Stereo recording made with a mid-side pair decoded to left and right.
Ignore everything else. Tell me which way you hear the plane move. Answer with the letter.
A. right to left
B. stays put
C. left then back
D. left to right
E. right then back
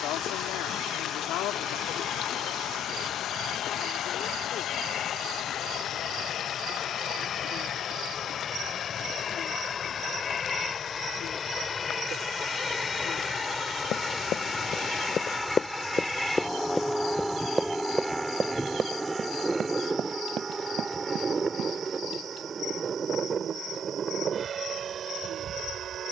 D.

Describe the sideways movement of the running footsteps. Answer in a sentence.
In this clip you hear the running footsteps travel towards the right.